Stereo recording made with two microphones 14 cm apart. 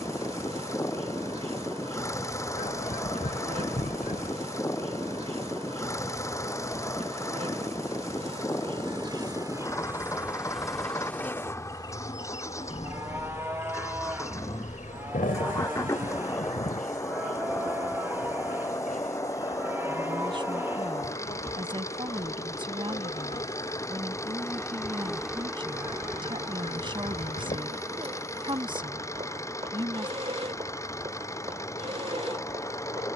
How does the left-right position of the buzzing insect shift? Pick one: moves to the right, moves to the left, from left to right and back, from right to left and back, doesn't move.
from right to left and back.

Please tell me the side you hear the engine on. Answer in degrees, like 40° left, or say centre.
20° left.